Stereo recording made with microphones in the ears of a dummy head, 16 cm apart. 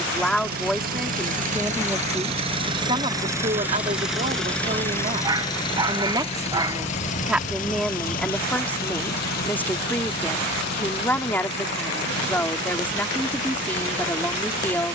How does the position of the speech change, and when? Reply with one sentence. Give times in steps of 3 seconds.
In this clip you hear the speech in the centre from 0 s, on the right from 3 s and in the centre from 6 s.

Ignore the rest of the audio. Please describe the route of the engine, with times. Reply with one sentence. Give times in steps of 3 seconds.
In this clip you hear the engine on the right from 0 s, in the centre from 3 s and on the left from 6 s.